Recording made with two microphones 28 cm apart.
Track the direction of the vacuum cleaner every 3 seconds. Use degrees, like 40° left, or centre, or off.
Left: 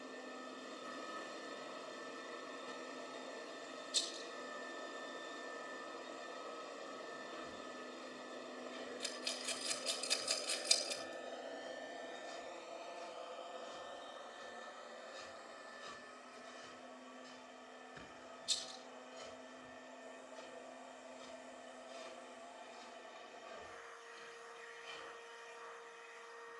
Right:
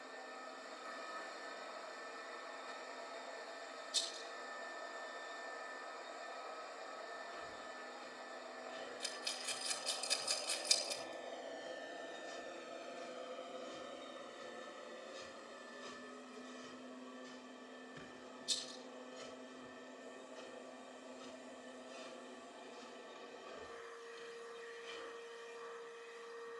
40° left, 40° left, 40° left, 20° left, 20° right, 40° right, 50° right, 50° right, 50° right.